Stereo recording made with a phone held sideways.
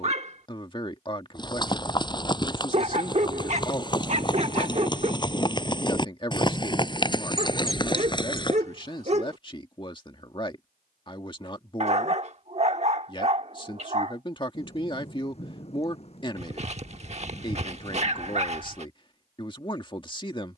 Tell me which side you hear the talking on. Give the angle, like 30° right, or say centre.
30° left.